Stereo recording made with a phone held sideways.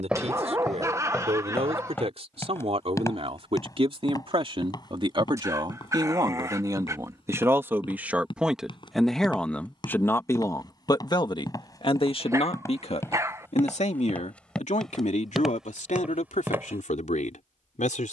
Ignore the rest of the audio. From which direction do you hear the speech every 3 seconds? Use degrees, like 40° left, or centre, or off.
50° right, 40° right, 20° right, 20° left, 60° left, 70° left.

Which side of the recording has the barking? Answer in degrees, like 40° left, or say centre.
20° right.